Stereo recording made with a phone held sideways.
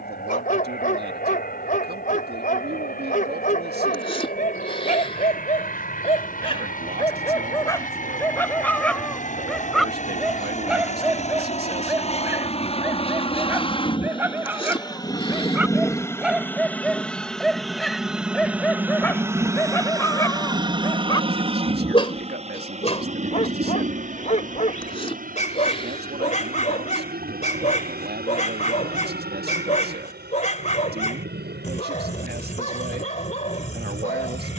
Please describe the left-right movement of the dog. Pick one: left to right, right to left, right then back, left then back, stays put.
right then back.